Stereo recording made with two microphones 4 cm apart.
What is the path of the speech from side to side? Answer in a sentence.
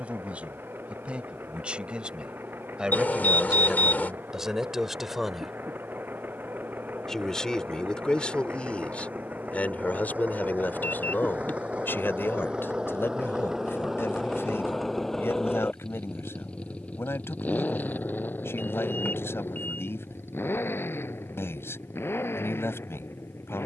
You can hear the speech go from the right side to the left.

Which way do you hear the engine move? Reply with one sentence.
In this clip you hear the engine move to the left.